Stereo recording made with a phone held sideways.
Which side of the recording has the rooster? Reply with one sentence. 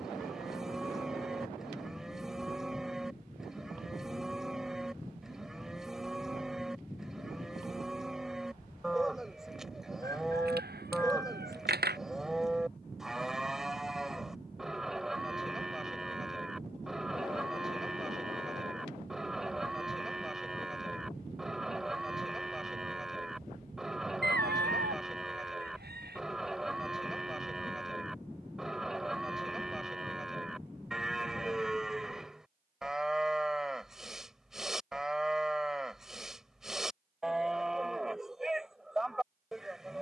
In this clip you hear the rooster on the right.